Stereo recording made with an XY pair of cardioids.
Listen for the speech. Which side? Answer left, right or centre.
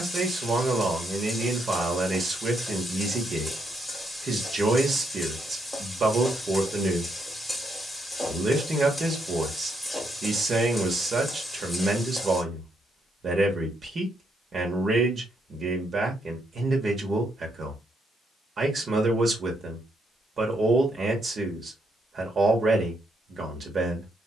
right.